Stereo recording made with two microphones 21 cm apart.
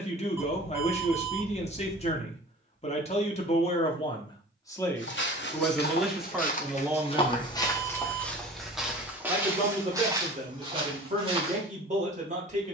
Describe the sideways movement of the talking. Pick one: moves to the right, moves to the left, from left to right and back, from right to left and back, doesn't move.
moves to the right.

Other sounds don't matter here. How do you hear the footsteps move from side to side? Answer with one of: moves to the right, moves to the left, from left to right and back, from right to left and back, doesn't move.
moves to the right.